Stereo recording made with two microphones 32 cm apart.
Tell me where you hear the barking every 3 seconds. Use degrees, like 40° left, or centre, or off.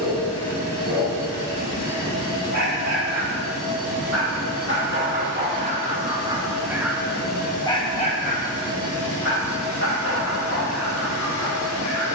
60° right, 40° right, centre, 50° left.